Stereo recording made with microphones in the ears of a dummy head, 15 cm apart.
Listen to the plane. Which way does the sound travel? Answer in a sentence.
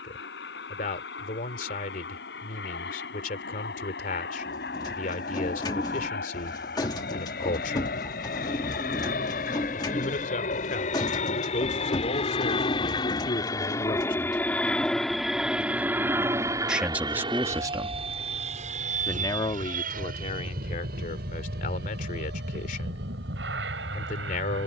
You can hear the plane go from the left side to the right.